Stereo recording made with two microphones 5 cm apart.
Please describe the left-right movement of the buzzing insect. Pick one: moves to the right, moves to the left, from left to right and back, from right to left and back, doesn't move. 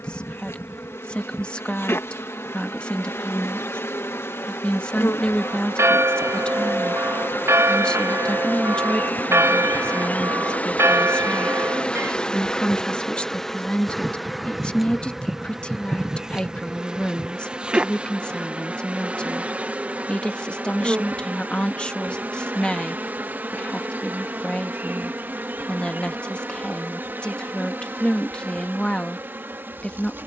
moves to the right.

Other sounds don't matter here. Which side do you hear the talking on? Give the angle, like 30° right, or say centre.
20° left.